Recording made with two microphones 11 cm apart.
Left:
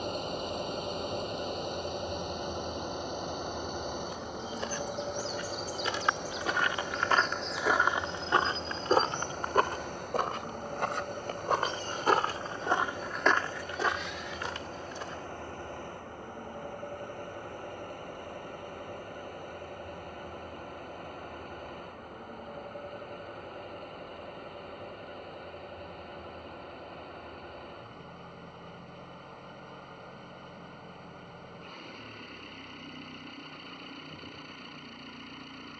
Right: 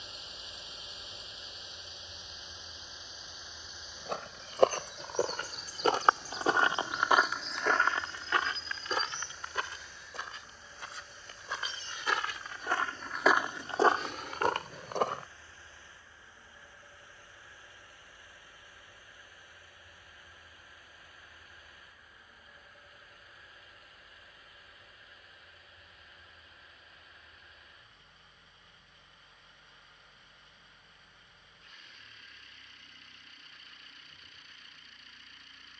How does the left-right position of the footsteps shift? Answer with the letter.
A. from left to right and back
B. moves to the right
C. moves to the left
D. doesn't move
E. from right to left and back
E.